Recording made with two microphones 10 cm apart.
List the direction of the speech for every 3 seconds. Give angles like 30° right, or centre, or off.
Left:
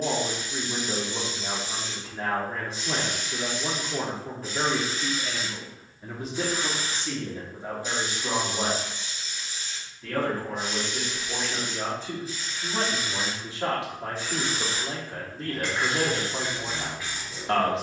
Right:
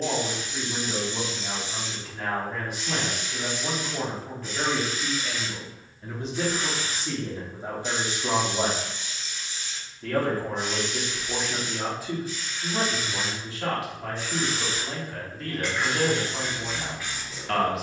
30° left, 30° left, 20° right, 30° right, 20° left, 30° left.